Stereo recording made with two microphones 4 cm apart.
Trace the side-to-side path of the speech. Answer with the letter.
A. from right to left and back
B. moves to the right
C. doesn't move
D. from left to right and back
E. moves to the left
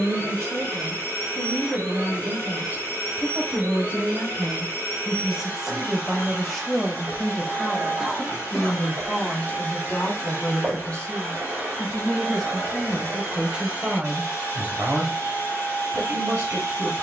A.